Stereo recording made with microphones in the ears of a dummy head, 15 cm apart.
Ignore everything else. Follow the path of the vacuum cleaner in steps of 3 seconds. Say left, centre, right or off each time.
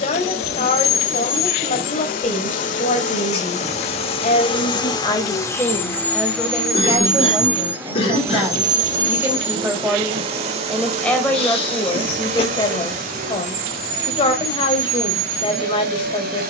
left, left, centre, right, right, right.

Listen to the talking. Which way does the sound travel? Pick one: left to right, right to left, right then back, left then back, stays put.
right then back.